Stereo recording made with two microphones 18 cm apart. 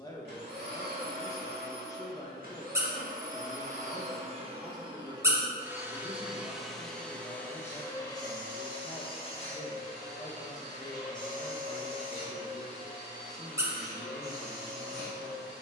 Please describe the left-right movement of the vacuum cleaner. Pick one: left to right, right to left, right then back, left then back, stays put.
right to left.